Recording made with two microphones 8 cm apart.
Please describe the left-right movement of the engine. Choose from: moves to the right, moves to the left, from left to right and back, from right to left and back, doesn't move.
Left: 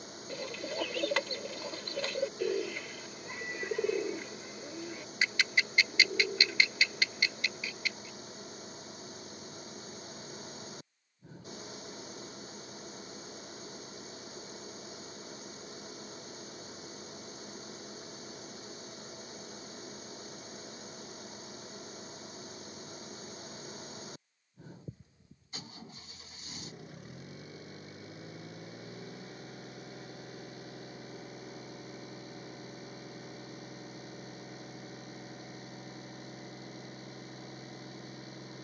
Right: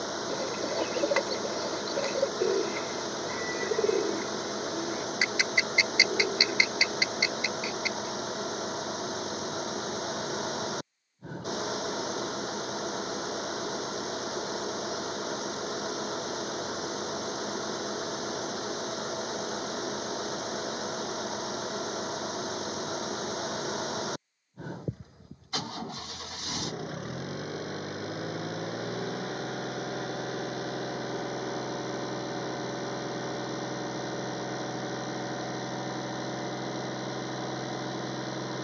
doesn't move.